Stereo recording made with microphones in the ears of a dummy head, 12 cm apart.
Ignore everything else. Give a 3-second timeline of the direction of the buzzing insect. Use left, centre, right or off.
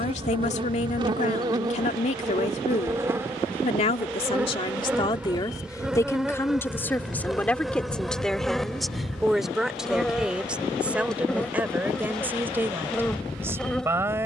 right, centre, centre, centre, centre.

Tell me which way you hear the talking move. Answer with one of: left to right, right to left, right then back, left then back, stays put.
left to right.